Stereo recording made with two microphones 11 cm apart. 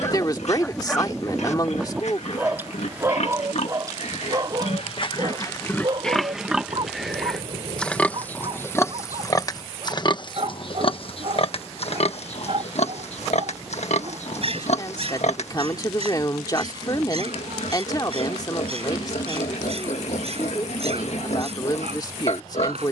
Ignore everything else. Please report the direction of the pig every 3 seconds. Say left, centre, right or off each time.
left, left, centre, left, left, left, left, left.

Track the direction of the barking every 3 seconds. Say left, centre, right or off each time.
centre, right, right, right, right, right, right, right.